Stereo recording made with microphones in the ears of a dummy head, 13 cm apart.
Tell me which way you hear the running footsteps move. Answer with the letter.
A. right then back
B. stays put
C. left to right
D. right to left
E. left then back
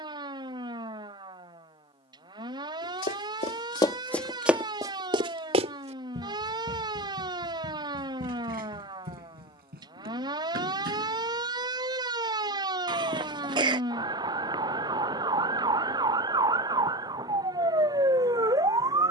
C.